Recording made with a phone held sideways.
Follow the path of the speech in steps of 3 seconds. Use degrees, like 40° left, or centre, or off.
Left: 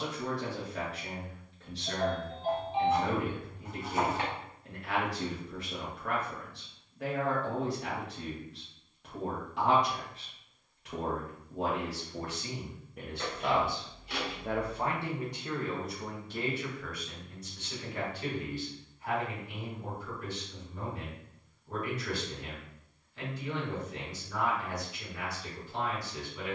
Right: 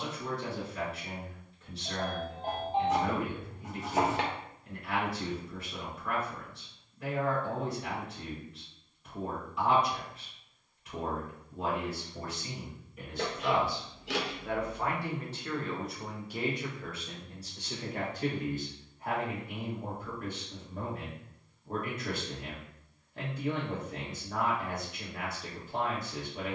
70° left, 70° left, 70° left, 70° left, 50° left, 10° right, 50° right, 50° right, 50° right.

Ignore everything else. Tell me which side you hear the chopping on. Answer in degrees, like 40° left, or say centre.
70° right.